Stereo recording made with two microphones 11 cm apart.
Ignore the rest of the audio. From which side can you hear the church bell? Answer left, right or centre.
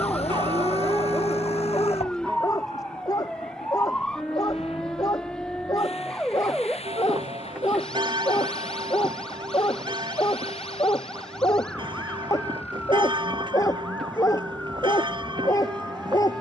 right.